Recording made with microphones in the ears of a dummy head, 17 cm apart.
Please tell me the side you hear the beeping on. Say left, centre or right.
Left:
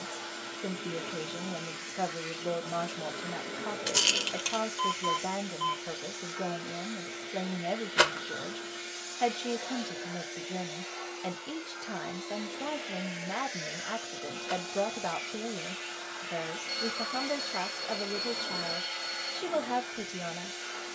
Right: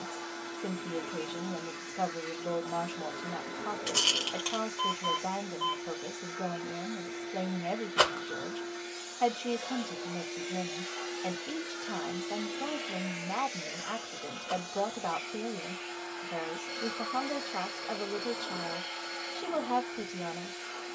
left.